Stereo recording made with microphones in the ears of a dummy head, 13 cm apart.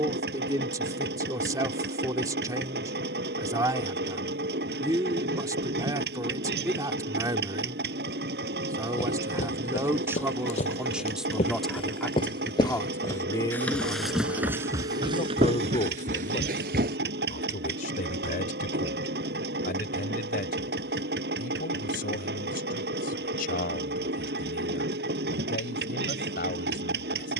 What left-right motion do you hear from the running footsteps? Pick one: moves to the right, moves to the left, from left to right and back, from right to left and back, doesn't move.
moves to the right.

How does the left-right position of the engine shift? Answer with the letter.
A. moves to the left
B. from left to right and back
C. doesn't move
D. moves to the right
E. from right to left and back
C.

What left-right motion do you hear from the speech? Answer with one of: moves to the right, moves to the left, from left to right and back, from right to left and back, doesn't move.
moves to the left.